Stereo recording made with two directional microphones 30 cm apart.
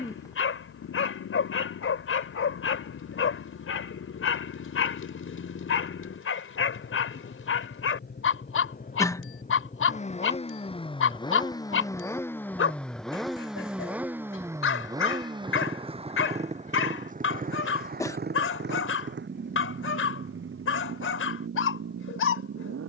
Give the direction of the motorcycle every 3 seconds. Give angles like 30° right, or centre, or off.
60° left, 50° left, 40° left, 20° left, centre, 20° right, 40° right, 50° right.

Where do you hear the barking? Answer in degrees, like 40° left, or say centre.
50° left.